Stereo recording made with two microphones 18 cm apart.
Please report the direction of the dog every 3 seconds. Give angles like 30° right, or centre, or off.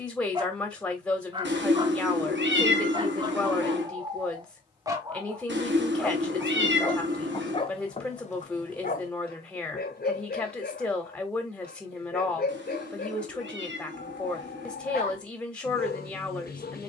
20° right, 20° right, 30° left, 60° left, 60° left, 60° left.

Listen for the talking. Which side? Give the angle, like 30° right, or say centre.
10° left.